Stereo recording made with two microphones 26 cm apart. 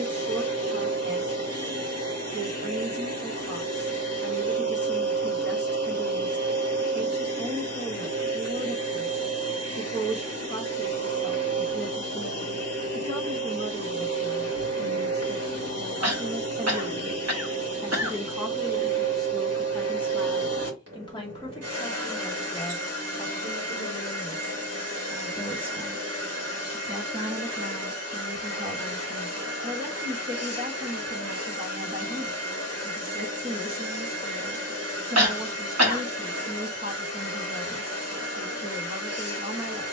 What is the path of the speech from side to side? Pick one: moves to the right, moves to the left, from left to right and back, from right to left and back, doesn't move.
from right to left and back.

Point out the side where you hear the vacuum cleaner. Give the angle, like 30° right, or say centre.
70° right.